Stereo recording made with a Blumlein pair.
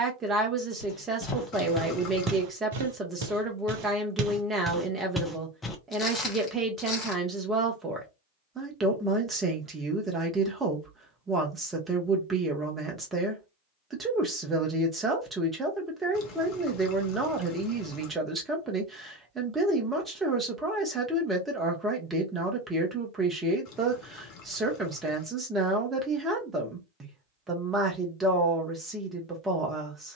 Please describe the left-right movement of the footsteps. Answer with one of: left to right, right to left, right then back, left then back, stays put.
right then back.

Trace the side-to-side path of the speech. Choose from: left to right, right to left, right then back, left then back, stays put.
stays put.